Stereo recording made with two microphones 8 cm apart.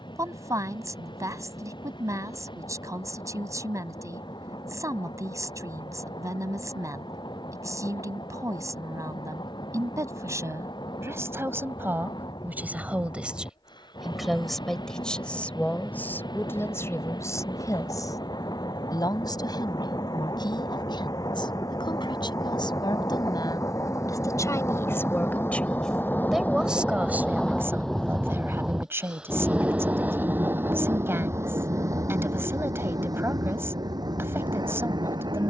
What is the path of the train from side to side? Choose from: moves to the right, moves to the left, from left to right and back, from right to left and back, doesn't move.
moves to the right.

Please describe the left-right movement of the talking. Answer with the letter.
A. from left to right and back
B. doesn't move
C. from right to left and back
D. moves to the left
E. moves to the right
C.